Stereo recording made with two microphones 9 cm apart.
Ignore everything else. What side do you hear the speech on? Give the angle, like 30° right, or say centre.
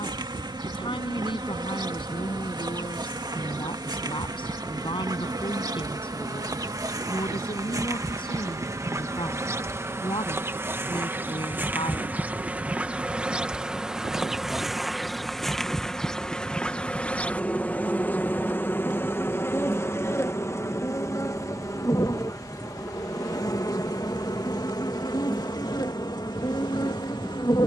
80° left.